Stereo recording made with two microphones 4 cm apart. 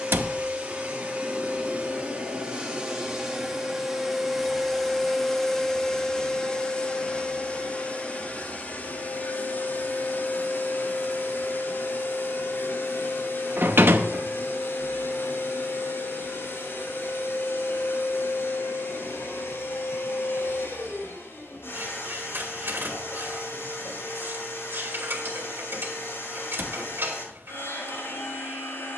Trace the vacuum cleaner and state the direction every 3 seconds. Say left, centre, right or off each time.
right, centre, left, left, left, left, left, left, left, left.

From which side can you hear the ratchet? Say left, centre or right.
right.